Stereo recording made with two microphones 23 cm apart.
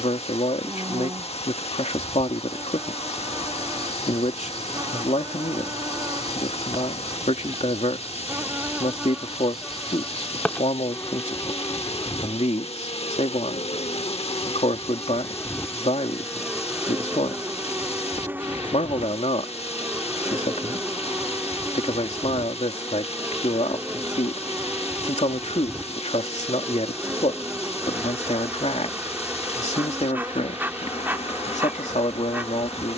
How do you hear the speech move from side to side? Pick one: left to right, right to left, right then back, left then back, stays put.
stays put.